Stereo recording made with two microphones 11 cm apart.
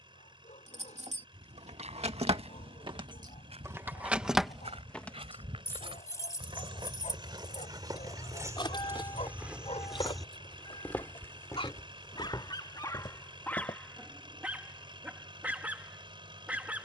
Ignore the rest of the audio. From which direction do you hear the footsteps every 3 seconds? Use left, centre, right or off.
right, right, right, centre, left, off.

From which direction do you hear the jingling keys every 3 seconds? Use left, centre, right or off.
right, centre, left, left, off, off.